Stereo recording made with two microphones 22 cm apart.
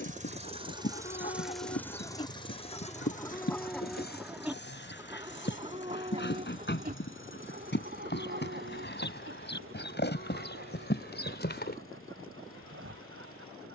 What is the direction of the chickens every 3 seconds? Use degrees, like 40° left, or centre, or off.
30° left, 10° right, 50° right, 70° right, 80° right.